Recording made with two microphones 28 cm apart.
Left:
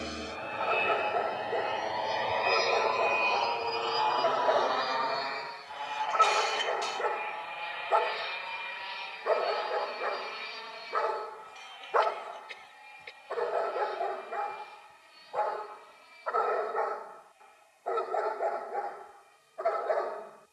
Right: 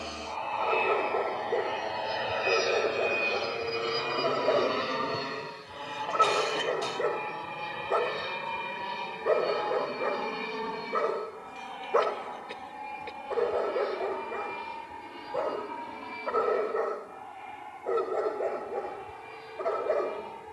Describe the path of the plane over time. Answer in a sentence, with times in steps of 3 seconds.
You can hear the plane in the centre from 0 s and on the right from 3 s.